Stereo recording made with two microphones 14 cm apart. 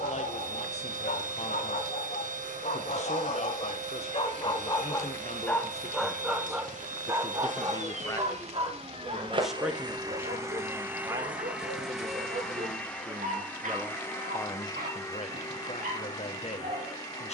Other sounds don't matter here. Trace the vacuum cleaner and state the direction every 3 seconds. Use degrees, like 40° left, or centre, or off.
60° right, 60° right, 50° right, 20° right, 10° left, 20° left.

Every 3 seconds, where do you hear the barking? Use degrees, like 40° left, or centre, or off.
70° left, 30° left, 20° right, 50° right, 60° right, 60° right.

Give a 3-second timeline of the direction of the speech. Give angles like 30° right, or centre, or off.
50° left, 50° left, 30° left, 10° right, 10° right, 40° left.